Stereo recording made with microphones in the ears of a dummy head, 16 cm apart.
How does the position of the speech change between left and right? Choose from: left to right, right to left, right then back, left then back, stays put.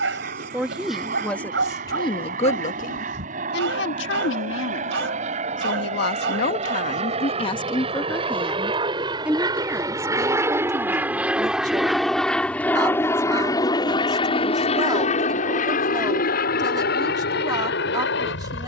left then back.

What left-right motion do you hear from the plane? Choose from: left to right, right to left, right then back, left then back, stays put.
right to left.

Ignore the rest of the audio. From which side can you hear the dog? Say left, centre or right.
right.